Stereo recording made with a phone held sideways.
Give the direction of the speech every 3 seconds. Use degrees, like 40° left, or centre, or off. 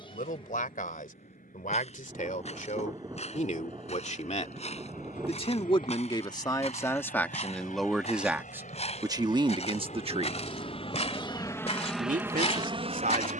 60° left, 40° left, 10° left, 30° right, 60° right.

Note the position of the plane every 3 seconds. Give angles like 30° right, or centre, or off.
80° left, 70° left, 70° left, 40° left, 30° right.